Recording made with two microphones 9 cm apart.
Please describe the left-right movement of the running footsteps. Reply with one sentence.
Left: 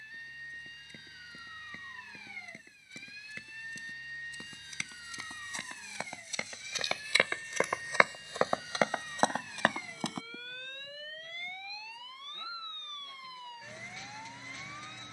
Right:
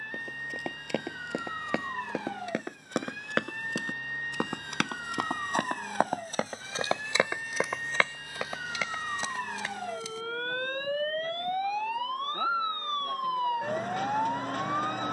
In this clip you hear the running footsteps go from the right side to the left.